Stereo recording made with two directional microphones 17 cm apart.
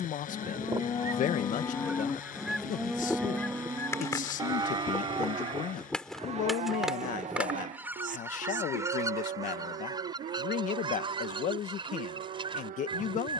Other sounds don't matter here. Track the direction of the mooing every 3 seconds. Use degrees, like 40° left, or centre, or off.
20° left, 20° right, 50° right, 60° right, 60° right.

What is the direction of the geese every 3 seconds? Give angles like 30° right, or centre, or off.
10° right, 10° left, 10° right, 30° right, 30° right.